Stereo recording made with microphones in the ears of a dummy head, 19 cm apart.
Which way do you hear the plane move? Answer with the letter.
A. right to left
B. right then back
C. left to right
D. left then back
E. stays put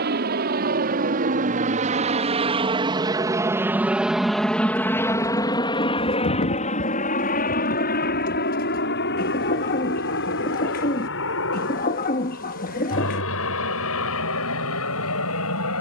A.